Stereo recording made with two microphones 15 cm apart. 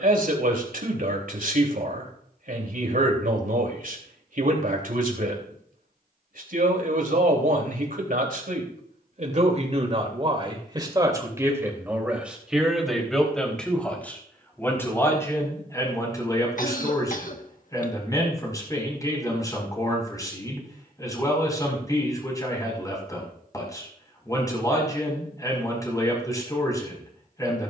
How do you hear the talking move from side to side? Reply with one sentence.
You can hear the talking move from right to left.